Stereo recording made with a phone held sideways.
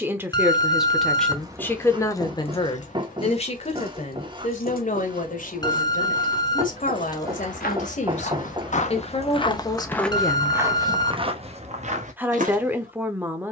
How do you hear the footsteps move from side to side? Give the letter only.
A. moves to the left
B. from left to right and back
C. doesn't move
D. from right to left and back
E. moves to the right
E.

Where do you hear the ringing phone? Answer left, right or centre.
left.